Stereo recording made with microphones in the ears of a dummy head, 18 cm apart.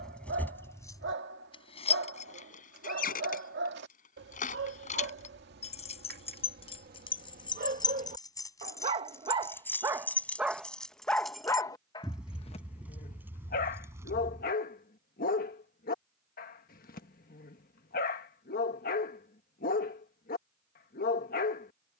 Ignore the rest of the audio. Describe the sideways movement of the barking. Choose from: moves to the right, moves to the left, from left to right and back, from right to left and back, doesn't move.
moves to the left.